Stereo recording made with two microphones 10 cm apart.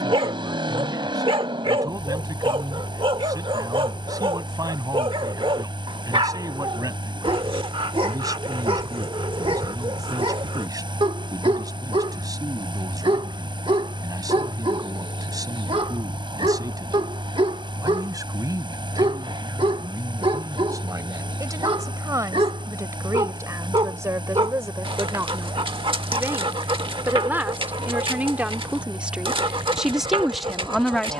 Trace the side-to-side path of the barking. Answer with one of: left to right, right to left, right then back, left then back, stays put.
stays put.